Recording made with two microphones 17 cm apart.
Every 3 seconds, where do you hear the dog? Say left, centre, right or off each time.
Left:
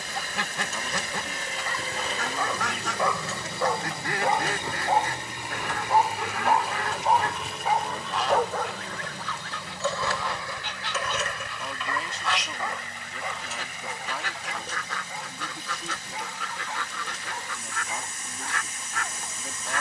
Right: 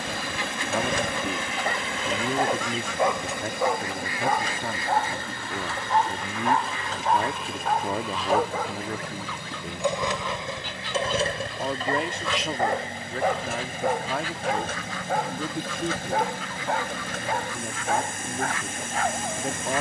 right, centre, centre, right, right, right, right.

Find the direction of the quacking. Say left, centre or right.
left.